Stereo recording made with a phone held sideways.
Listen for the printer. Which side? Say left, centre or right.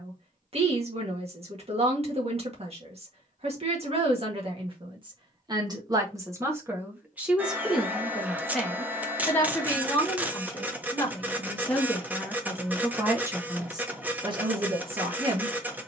centre.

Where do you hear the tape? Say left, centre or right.
centre.